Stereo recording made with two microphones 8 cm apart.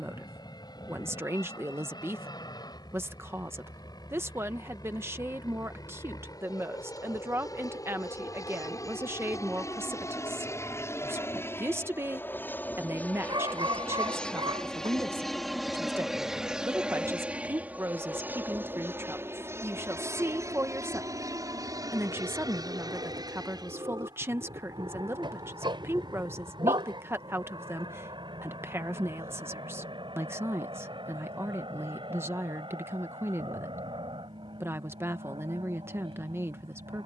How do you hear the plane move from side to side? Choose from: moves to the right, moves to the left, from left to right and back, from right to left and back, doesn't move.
moves to the right.